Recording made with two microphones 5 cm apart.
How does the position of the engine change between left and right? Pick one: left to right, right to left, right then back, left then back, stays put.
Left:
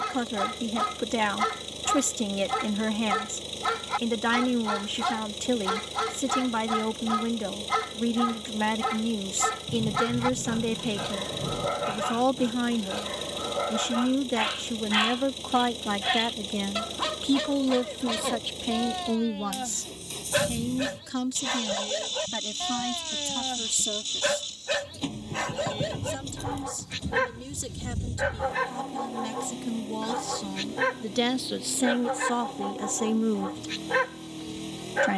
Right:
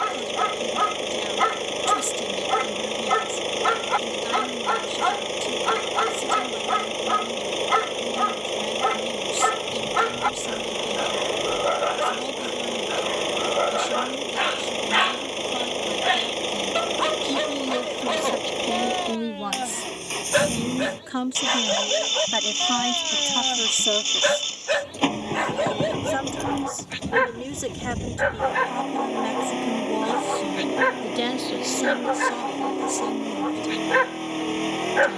stays put.